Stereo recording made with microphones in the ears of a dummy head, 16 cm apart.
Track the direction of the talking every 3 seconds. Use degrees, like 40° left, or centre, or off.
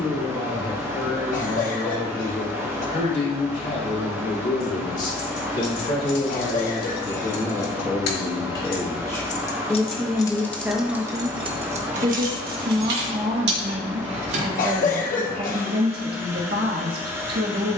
50° left, 50° left, 30° left, centre, 50° right, 60° right.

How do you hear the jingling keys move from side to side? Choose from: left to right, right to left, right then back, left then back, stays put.
left to right.